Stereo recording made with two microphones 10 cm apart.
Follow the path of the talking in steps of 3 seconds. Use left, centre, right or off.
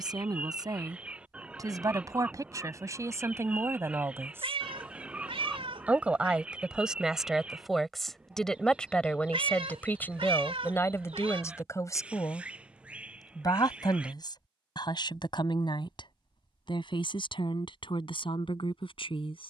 right, right, centre, left, left, left, left.